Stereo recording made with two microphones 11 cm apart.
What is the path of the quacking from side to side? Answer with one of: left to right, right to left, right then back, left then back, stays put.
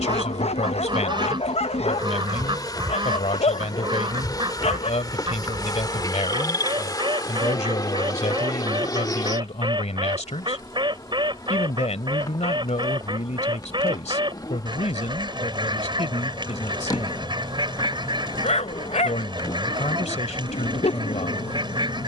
stays put.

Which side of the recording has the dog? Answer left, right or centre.
left.